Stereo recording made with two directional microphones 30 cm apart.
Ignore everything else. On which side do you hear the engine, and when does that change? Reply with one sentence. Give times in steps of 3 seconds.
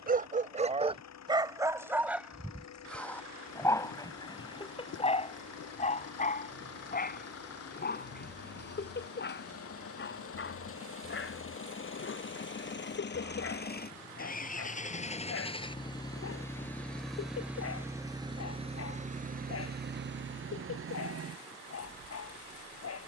In this clip you hear the engine on the left from 0 s, in the centre from 15 s and on the right from 18 s.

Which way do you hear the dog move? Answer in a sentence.
In this clip you hear the dog move to the left.